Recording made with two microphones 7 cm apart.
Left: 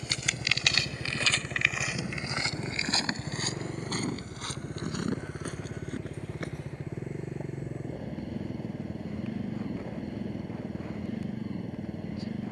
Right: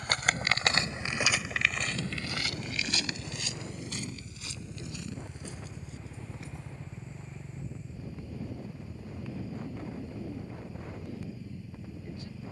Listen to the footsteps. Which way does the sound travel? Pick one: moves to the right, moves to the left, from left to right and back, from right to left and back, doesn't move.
moves to the left.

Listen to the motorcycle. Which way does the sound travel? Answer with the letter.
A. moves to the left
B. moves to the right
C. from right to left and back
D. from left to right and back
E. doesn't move
E.